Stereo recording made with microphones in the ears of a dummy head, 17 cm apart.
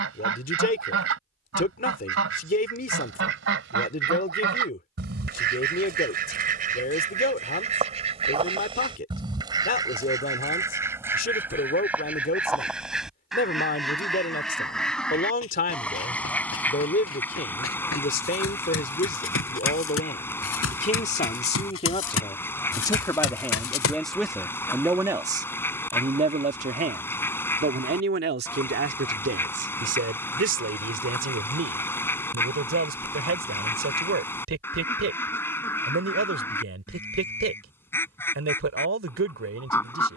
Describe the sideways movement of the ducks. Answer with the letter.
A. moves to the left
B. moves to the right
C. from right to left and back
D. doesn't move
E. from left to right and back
A.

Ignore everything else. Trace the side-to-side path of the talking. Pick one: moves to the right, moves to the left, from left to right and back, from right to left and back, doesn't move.
moves to the right.